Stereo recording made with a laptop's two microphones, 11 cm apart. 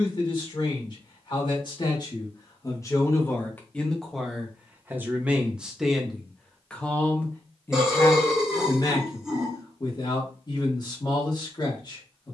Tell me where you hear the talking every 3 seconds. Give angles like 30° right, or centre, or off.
40° left, centre, 20° left, 40° left.